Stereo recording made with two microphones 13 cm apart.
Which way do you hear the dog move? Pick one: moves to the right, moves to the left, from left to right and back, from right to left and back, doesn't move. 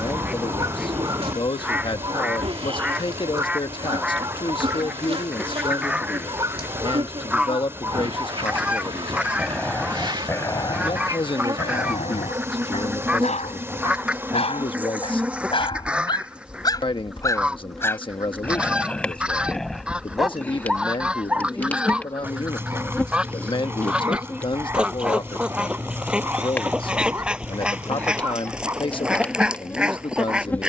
from right to left and back.